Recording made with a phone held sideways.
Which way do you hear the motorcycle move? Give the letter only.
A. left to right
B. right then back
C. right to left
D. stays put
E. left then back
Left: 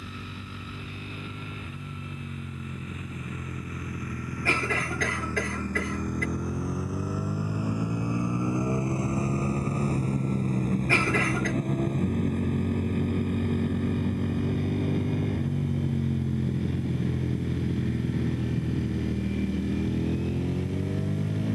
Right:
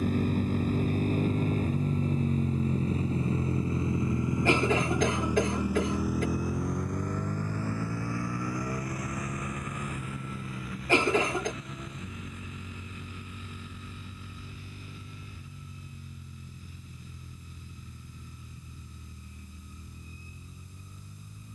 C.